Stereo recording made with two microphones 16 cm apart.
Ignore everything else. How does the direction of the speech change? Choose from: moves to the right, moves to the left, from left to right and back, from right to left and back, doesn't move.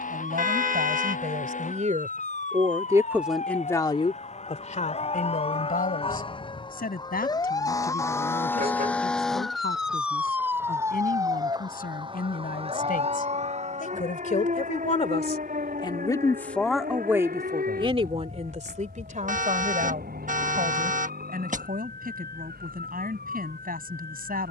from right to left and back.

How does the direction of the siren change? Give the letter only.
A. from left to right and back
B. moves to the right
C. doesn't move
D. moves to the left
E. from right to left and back
B.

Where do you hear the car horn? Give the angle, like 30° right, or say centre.
60° right.